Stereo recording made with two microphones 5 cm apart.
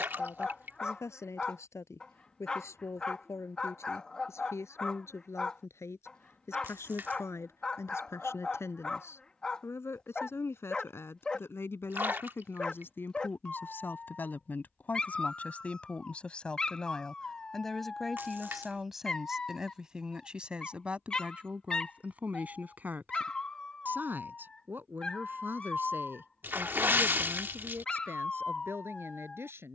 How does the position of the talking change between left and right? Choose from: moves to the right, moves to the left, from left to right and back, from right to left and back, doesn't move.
moves to the right.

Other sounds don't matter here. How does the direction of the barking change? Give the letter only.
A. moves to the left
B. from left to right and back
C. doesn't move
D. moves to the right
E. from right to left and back
C.